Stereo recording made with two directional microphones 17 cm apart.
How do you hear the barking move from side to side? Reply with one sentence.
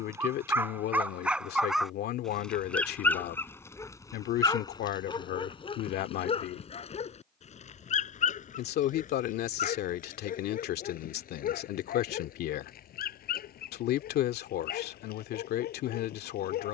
You can hear the barking go from the right side to the left.